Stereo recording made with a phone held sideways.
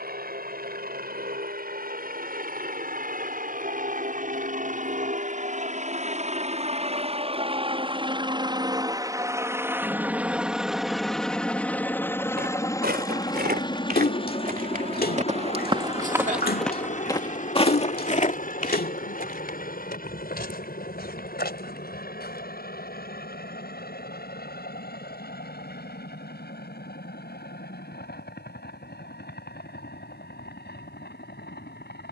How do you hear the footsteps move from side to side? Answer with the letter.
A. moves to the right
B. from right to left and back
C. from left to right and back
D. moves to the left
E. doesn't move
D.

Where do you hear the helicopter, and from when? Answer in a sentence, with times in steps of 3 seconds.
You can hear the helicopter on the right from 0 s, in the centre from 9 s and on the left from 12 s.